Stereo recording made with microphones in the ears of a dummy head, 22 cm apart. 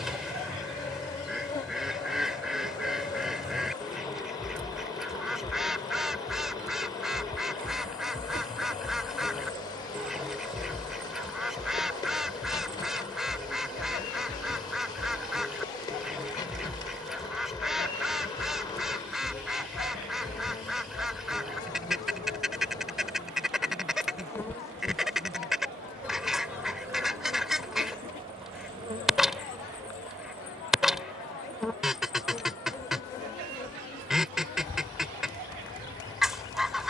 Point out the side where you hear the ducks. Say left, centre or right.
centre.